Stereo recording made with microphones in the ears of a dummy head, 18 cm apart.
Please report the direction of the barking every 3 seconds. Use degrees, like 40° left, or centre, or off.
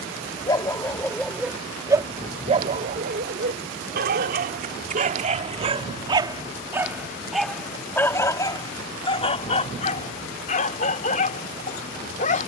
10° right, 40° right, centre, 40° left.